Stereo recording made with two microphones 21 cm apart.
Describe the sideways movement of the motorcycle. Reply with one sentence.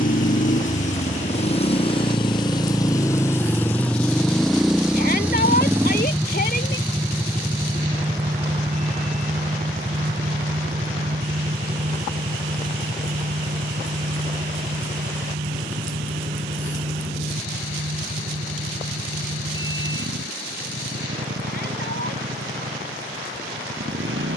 In this clip you hear the motorcycle travel towards the right.